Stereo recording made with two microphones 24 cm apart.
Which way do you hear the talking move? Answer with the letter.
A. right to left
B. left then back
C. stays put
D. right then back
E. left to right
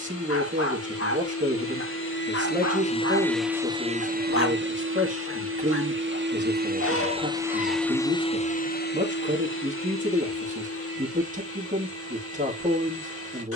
C.